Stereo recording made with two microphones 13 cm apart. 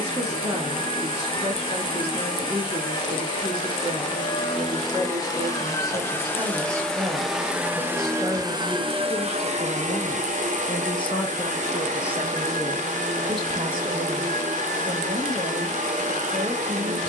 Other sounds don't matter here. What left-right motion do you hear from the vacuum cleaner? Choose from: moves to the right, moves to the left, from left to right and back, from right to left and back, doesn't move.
moves to the right.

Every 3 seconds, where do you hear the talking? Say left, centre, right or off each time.
right, right, centre, left, right, right.